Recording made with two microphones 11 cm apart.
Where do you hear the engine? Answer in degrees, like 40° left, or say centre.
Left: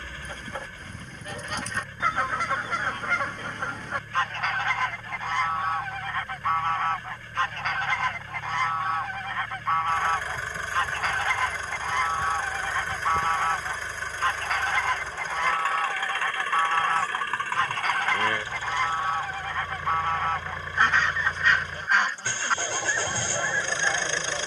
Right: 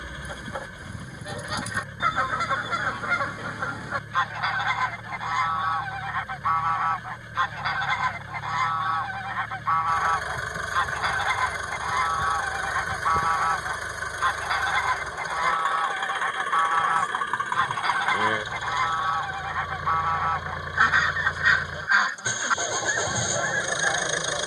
10° right.